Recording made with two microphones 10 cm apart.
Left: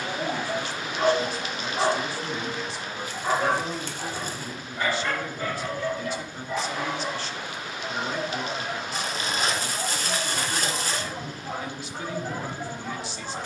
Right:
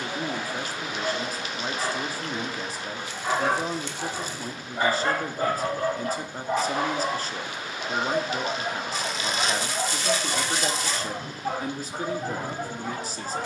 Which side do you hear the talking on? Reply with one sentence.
In this clip you hear the talking on the right.